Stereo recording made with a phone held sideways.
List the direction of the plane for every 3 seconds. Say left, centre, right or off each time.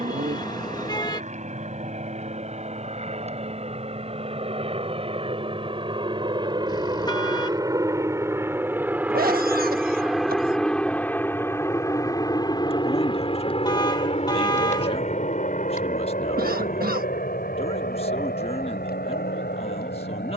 right, right, right, centre, left, left, left.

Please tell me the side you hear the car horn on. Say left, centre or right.
left.